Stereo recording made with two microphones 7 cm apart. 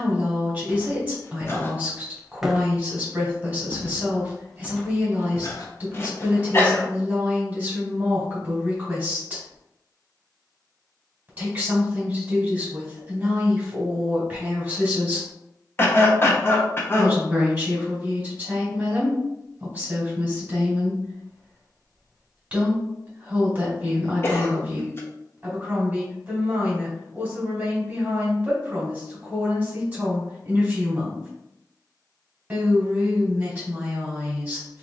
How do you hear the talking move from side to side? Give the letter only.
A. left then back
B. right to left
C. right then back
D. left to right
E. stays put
E.